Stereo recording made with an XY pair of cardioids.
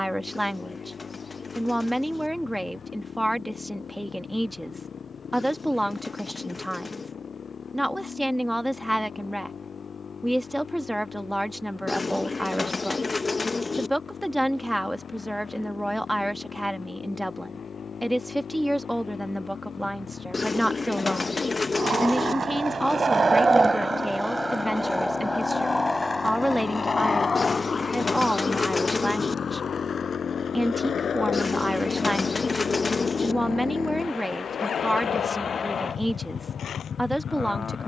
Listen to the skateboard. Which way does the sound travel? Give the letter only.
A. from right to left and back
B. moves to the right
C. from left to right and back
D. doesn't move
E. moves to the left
E.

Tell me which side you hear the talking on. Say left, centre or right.
centre.